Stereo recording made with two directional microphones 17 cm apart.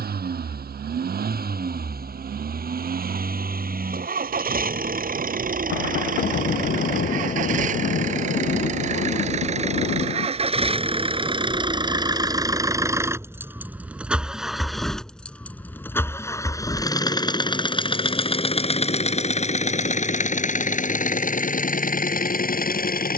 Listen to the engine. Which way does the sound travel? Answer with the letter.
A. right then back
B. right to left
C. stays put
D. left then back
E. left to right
B.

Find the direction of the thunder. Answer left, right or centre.
left.